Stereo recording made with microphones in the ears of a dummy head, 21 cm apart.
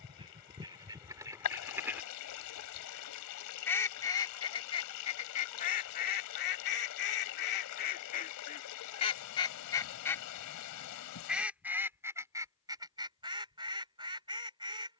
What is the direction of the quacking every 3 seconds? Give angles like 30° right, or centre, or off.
10° right, 20° left, 40° left, centre, 20° right.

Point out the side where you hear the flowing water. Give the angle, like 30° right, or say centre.
80° left.